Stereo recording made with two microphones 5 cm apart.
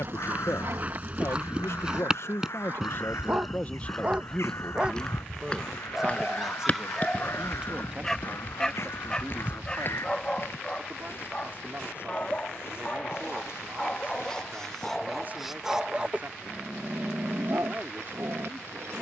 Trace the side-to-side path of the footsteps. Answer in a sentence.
You can hear the footsteps move from right to left.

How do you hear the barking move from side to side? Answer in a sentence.
In this clip you hear the barking move from right to left and back again.